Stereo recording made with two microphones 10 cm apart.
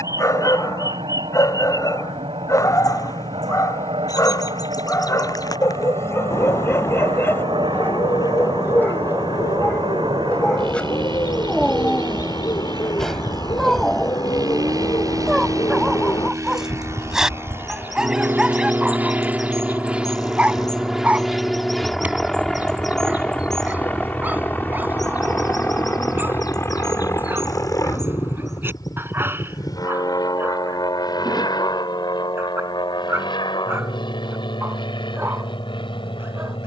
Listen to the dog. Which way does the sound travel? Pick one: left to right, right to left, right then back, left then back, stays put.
left to right.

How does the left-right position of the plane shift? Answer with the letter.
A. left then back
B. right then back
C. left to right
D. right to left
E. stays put
D.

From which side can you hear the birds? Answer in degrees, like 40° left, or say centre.
40° left.